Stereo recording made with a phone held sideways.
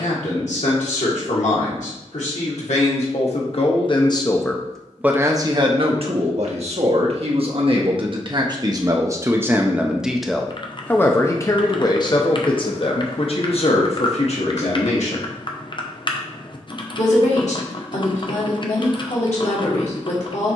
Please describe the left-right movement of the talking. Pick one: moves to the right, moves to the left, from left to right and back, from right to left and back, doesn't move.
from left to right and back.